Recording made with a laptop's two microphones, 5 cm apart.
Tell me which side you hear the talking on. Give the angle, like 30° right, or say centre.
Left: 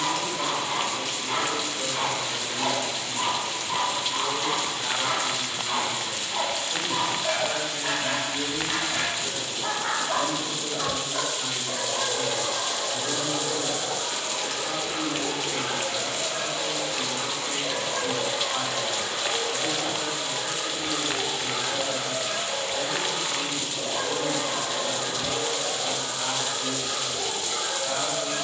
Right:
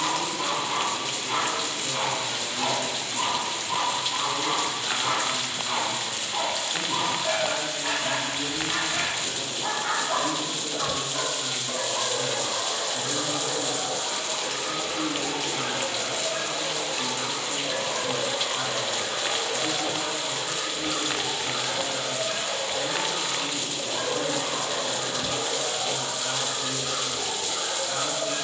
80° left.